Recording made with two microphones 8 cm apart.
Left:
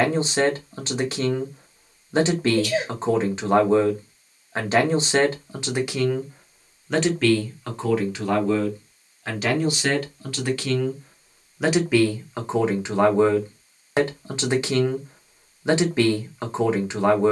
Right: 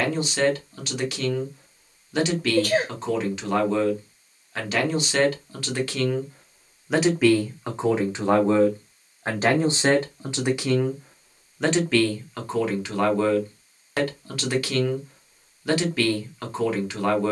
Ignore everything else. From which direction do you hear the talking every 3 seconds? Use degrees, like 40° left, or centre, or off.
30° left, 30° left, 20° right, 20° right, 20° left, 20° left.